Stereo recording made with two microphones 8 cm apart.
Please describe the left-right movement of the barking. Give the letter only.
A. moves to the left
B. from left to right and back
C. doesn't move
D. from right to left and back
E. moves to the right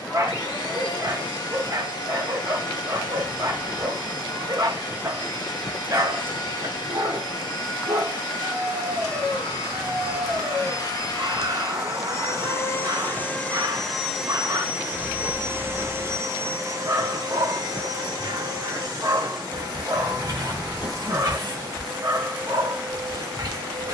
C.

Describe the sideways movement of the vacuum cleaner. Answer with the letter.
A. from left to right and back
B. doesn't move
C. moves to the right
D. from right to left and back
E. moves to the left
C.